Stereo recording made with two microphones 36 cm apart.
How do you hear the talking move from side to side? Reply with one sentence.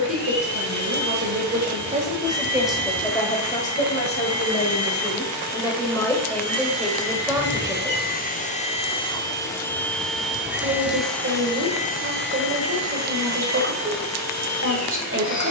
You can hear the talking go left and come back.